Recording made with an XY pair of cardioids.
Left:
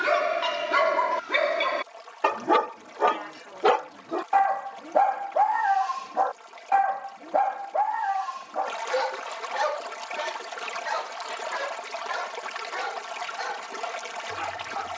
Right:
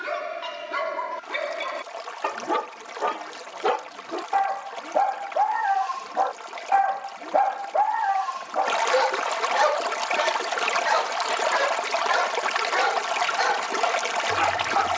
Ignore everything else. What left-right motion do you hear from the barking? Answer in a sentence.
In this clip you hear the barking go from the left side to the right.